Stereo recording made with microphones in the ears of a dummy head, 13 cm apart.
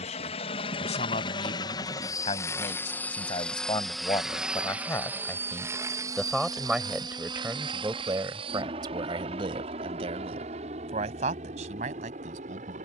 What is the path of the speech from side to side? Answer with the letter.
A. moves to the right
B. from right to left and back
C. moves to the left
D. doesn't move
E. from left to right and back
A.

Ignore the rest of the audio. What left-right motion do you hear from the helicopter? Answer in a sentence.
You can hear the helicopter move from left to right.